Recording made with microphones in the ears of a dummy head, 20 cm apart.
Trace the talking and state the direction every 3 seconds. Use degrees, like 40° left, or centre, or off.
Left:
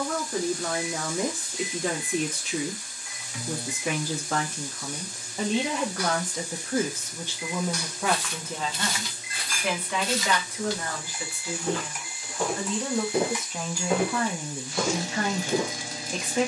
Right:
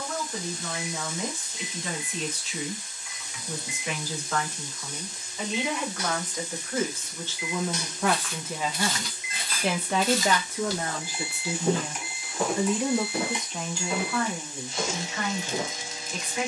50° left, 40° left, 10° left, 30° right, 10° left, 40° left.